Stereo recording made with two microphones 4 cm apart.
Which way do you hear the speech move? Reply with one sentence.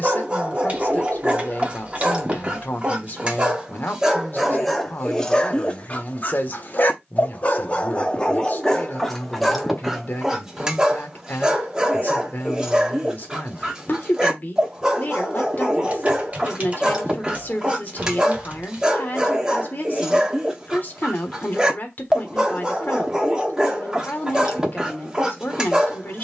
You can hear the speech stay put.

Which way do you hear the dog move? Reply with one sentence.
In this clip you hear the dog move from right to left and back again.